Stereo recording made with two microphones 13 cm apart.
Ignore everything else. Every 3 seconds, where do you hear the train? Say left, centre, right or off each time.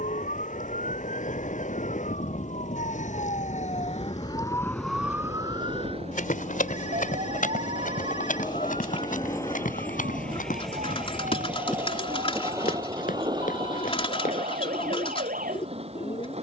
left, left, left, centre, right, right.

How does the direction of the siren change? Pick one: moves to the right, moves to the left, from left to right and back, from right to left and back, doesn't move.
moves to the right.